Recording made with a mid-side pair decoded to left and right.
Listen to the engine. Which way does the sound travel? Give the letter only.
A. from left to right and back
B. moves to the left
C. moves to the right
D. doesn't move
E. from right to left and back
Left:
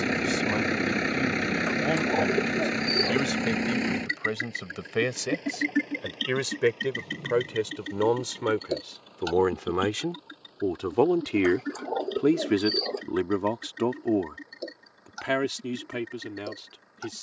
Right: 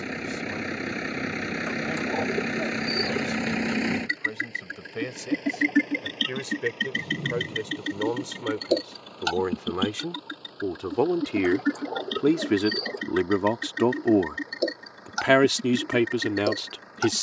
C.